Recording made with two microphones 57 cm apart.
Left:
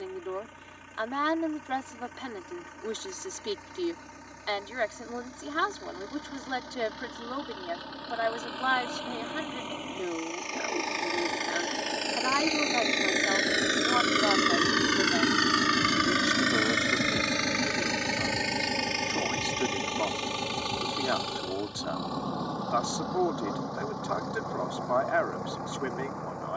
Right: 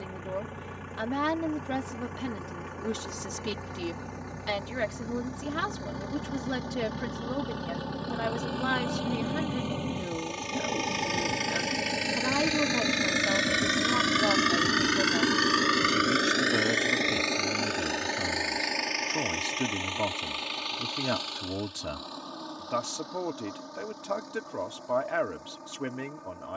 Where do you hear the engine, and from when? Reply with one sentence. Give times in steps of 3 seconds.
In this clip you hear the engine on the right from 0 s and on the left from 15 s.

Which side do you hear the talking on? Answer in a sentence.
In this clip you hear the talking on the right.